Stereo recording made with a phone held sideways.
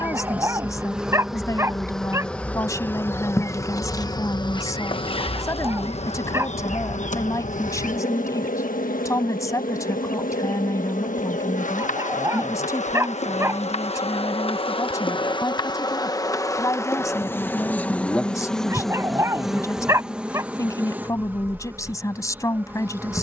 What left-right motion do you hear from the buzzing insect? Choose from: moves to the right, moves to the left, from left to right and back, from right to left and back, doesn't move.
from right to left and back.